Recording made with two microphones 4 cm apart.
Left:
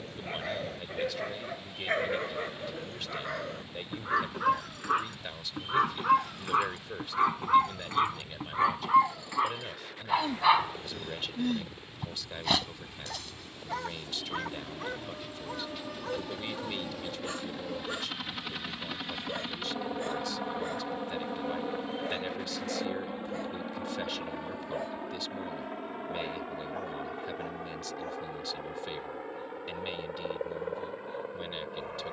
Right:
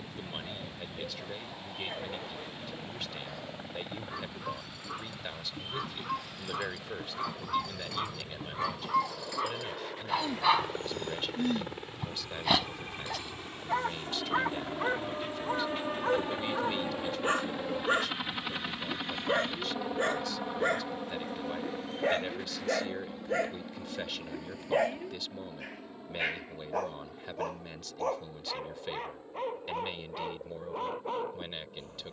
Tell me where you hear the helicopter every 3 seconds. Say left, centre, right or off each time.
right, right, right, right, right, right, centre, left, left, left, left.